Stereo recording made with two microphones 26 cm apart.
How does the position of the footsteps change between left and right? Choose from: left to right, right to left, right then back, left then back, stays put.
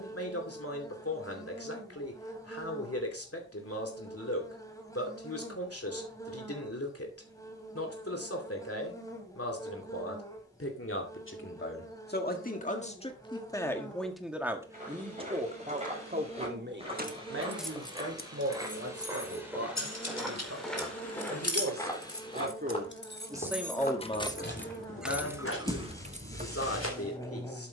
right to left.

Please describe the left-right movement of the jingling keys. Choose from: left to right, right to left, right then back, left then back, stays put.
left then back.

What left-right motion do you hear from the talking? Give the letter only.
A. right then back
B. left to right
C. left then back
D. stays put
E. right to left
A.